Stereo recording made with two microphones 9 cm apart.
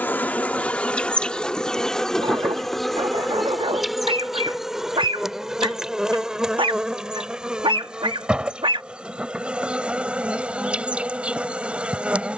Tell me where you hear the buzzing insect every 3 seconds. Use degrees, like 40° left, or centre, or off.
10° left, centre, 10° right, 10° right.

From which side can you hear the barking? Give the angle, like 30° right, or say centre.
80° right.